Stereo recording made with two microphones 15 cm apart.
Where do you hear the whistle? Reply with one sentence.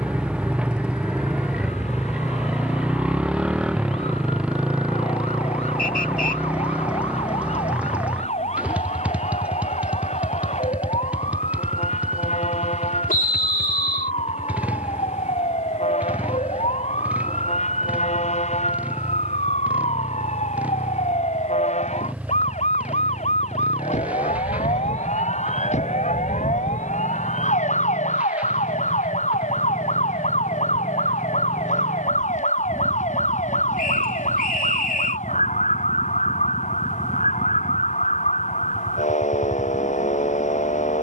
You can hear the whistle on the left.